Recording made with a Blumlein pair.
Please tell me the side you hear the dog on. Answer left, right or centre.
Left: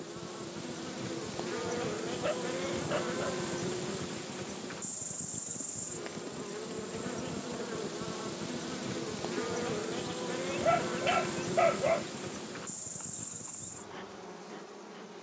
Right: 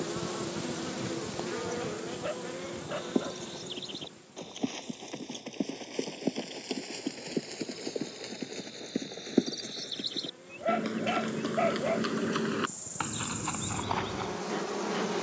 centre.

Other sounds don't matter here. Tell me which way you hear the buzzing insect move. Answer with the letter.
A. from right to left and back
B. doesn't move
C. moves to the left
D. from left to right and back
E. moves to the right
A.